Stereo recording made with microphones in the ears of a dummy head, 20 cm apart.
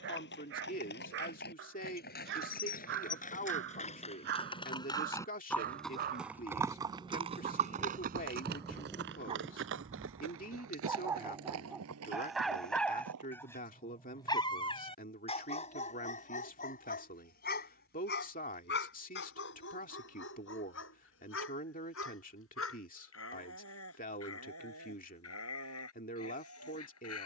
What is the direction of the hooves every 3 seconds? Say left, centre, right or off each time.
left, left, right, right, right, off, off, off, off.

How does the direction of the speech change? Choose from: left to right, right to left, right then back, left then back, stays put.
stays put.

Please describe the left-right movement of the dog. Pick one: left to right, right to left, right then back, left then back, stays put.
right to left.